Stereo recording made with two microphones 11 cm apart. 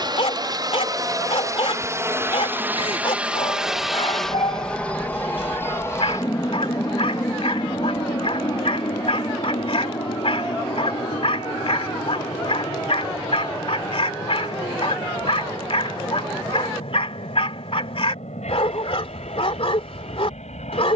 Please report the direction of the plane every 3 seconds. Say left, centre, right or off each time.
right, centre, left, left, left, left, left.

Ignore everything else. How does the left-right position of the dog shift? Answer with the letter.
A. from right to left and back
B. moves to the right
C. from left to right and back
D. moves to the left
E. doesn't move
E.